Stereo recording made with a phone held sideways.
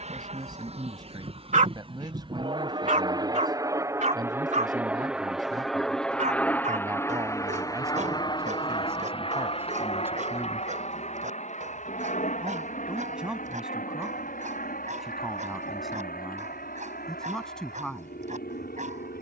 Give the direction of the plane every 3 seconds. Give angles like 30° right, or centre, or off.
40° right, 10° right, 20° left, 40° left, 60° left, 60° left, 70° left.